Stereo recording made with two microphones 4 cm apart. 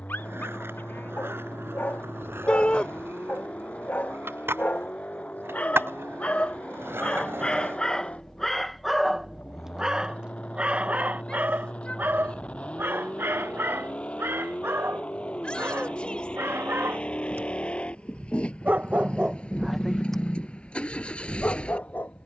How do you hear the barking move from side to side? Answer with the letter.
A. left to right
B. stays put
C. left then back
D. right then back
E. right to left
D.